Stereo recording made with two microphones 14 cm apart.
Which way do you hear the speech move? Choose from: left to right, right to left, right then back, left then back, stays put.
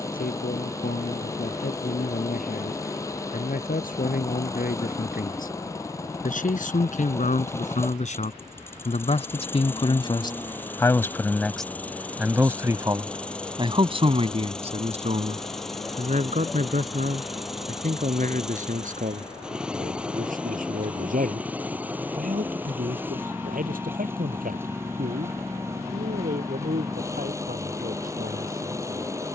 left to right.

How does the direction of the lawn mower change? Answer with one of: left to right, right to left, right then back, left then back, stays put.
left to right.